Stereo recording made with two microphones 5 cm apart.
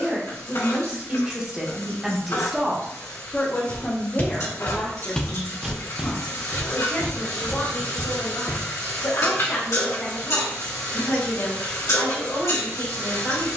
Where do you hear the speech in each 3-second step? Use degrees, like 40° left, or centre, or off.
20° right, 30° left, 60° left, 70° left, 70° left.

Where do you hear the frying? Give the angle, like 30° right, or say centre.
80° left.